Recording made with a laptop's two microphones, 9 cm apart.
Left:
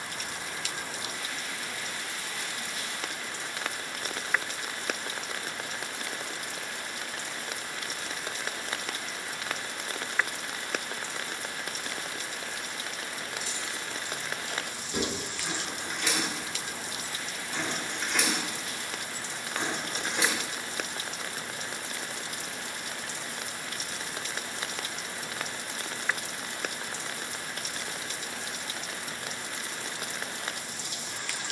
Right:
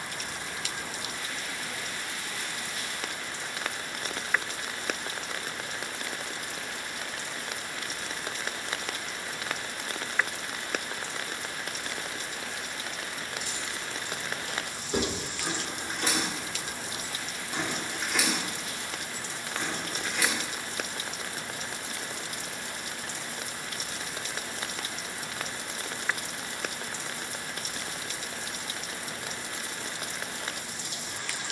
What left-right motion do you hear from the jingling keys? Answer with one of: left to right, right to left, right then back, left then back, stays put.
right to left.